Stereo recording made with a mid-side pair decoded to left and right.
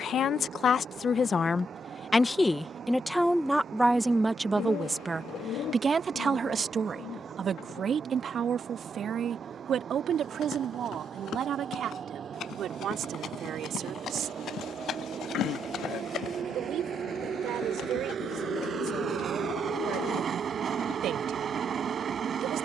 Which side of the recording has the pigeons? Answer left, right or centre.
left.